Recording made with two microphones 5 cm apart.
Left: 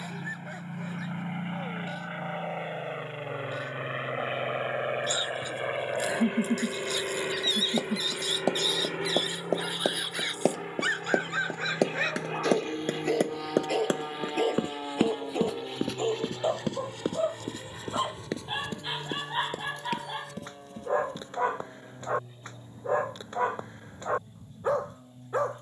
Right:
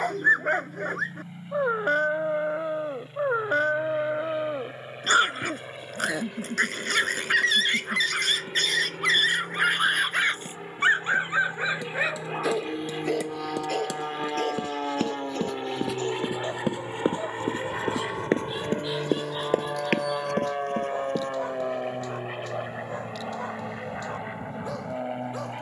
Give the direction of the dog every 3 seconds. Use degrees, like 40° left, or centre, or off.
60° right, 60° right, 60° right, 40° right, centre, 20° left, 30° left, 30° left, 30° left.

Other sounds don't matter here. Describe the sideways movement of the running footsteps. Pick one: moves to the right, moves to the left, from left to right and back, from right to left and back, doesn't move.
moves to the right.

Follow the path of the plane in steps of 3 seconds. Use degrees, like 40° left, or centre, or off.
50° left, 40° left, 30° left, 10° left, 10° right, 30° right, 50° right, 60° right, 60° right.